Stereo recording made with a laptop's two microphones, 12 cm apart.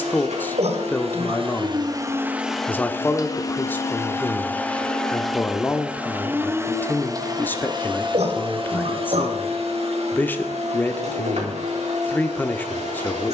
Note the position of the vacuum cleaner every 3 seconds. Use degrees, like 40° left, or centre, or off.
40° right, 10° left, 30° right, 60° right, 70° right.